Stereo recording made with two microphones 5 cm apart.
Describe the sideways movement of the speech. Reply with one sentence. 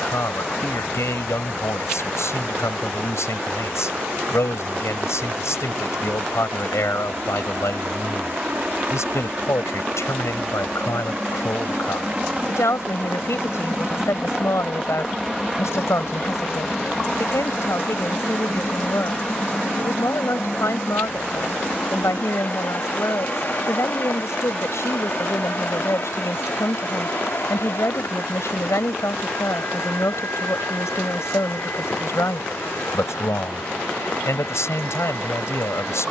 You can hear the speech stay in one place.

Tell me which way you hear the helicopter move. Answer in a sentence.
In this clip you hear the helicopter move to the left.